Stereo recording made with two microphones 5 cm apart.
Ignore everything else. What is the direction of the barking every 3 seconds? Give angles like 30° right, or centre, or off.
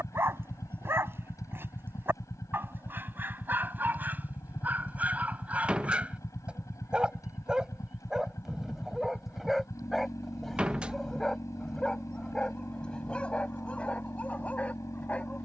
40° right, 30° right, 10° right, centre, 20° left.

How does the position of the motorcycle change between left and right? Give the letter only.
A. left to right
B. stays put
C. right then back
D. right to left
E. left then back
B.